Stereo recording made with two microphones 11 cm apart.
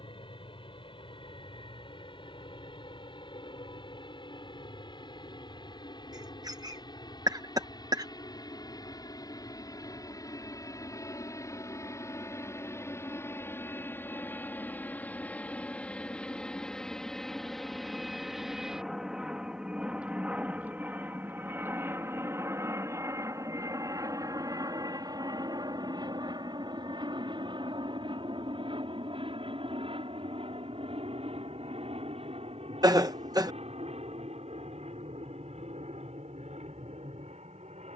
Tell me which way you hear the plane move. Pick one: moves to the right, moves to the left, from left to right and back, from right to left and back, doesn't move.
moves to the right.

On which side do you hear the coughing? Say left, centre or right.
right.